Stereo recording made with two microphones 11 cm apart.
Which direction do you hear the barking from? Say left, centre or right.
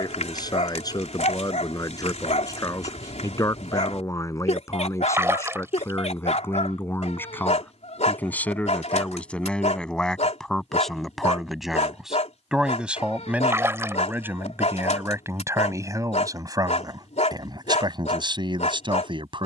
left.